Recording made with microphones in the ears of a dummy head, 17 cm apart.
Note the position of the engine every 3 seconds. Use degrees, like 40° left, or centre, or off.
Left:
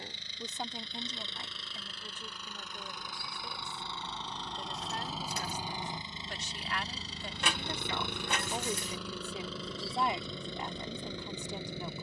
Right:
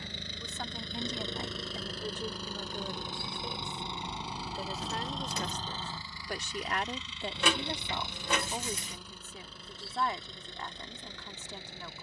40° right, 10° right, 40° left, 70° left.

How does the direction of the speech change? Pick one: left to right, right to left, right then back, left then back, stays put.
right then back.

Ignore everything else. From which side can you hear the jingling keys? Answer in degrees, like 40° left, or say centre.
60° right.